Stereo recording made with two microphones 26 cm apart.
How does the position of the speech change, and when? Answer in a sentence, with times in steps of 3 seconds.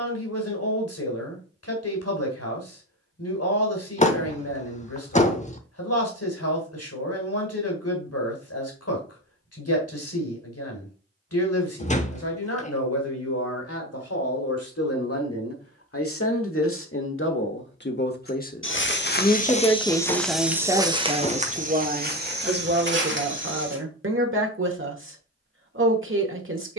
You can hear the speech on the left from 0 s, in the centre from 18 s and on the right from 21 s.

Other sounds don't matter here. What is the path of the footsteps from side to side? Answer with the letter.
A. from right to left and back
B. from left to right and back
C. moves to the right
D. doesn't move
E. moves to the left
C.